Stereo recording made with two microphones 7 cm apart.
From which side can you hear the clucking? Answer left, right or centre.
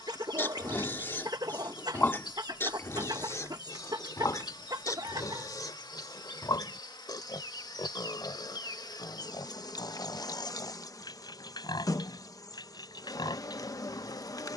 right.